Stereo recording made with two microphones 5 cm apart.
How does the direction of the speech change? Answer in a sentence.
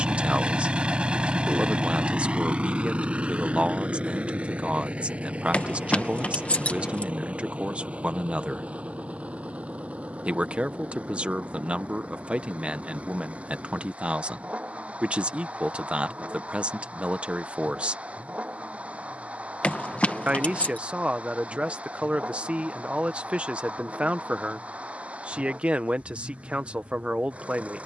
You can hear the speech stay put.